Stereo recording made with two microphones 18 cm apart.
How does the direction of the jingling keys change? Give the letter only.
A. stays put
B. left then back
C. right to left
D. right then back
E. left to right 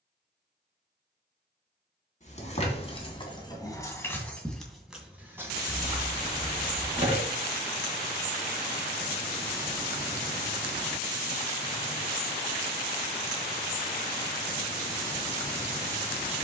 E.